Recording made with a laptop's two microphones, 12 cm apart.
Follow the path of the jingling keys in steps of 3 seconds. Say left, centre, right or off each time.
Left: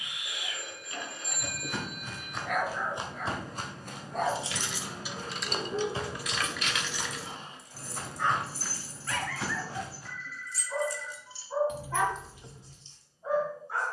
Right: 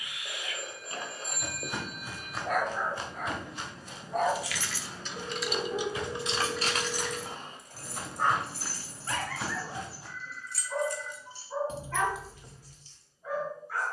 off, centre, right, right, centre.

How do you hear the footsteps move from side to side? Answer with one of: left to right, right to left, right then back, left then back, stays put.
left then back.